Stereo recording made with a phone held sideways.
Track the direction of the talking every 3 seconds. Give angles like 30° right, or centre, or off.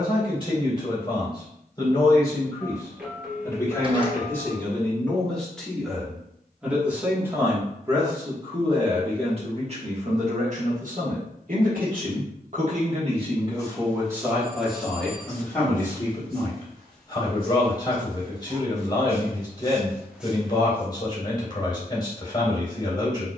30° left, 10° left, 20° right, 50° right, 30° right, 20° left, 30° left, 30° left.